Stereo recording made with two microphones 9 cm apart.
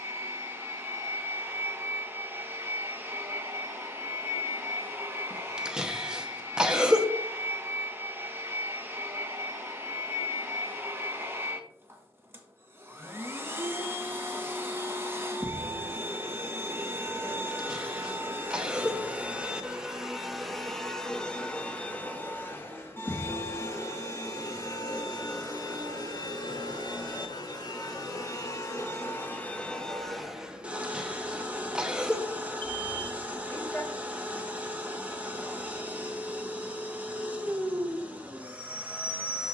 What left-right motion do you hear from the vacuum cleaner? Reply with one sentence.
You can hear the vacuum cleaner move from right to left and back again.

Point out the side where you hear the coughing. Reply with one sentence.
In this clip you hear the coughing in the centre.